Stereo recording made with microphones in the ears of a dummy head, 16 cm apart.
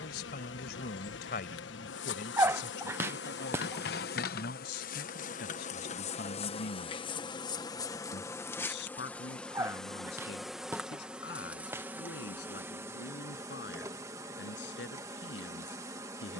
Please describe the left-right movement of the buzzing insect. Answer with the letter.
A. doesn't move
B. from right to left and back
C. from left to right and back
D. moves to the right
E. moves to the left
D.